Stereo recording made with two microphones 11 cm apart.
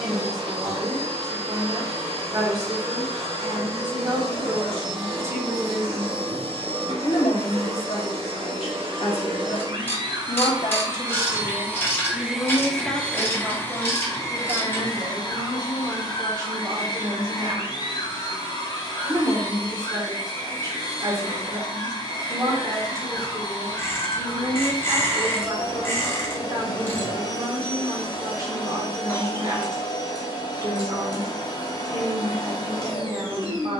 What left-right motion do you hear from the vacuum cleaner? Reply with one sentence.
You can hear the vacuum cleaner move to the left.